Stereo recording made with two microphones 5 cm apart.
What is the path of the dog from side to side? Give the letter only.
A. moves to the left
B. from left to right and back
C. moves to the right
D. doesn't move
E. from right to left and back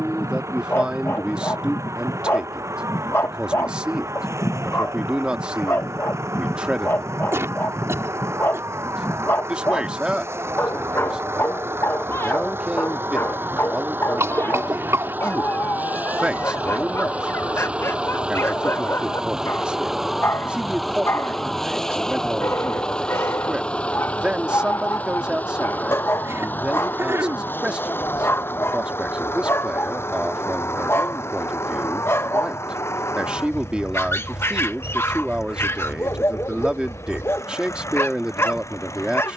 D.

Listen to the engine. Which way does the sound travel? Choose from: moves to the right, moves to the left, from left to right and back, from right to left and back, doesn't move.
moves to the left.